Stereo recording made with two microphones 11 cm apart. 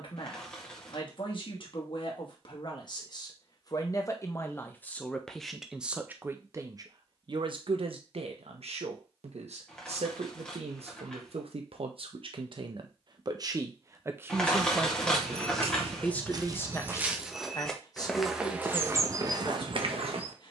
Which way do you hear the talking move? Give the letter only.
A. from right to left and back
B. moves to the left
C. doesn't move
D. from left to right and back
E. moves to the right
D.